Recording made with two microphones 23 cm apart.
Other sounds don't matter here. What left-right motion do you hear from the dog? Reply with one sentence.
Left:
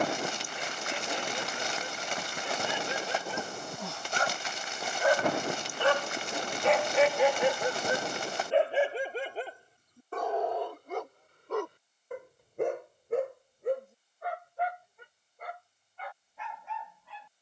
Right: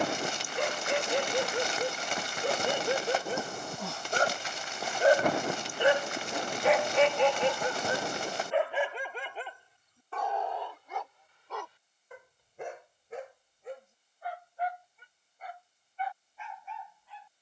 You can hear the dog move to the left.